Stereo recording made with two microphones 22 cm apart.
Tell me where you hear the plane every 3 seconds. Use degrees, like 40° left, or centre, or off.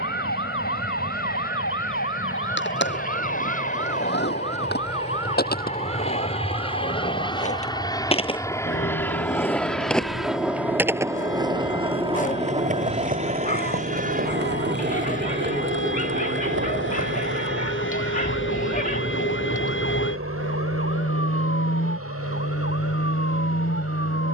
50° left, 40° left, 20° left, centre, 30° right, 50° right, 60° right, 70° right.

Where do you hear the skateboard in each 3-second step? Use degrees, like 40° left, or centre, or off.
60° left, 50° left, 30° left, 10° right, 40° right, 60° right, off, off.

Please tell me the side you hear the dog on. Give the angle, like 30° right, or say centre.
40° left.